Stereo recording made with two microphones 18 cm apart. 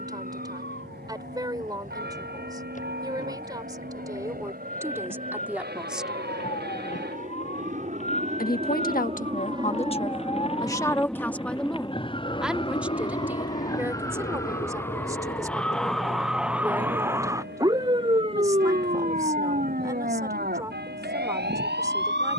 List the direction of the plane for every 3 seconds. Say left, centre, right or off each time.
right, right, right, centre, left, left, left, left.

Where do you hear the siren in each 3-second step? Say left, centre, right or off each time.
left, left, left, left, left, centre, right, right.